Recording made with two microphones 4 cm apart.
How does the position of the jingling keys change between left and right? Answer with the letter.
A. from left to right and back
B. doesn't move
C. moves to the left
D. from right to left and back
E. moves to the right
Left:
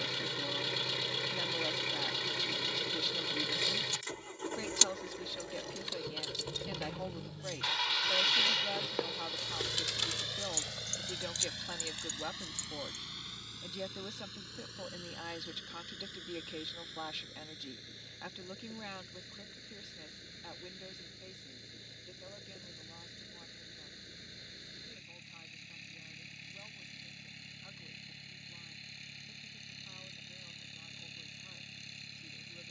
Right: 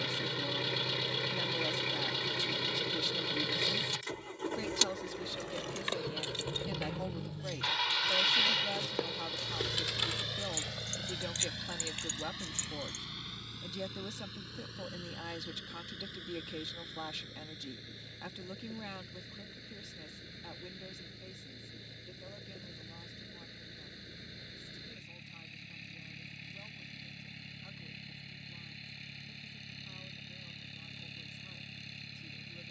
D.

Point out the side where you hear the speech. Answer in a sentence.
In this clip you hear the speech in the centre.